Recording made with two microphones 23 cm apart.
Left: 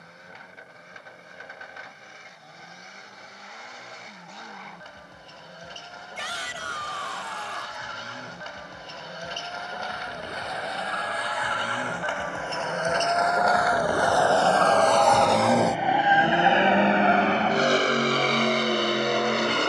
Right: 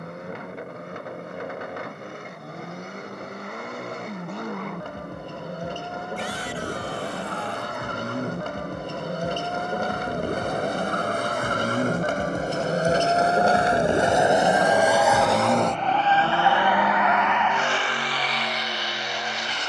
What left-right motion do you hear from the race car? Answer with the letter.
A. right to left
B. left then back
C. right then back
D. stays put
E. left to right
A.